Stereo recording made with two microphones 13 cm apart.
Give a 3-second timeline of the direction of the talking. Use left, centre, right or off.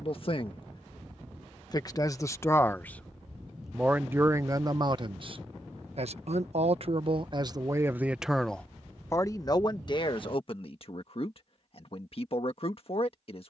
left, right, right, left, left.